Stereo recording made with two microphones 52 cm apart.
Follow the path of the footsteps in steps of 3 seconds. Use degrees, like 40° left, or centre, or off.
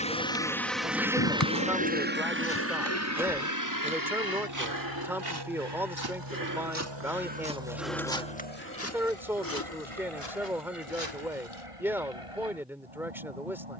30° left, 30° right, 10° right, 50° left, off.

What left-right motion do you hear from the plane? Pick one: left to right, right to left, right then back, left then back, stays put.
left to right.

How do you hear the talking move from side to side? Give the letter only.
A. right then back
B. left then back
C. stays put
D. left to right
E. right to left
C.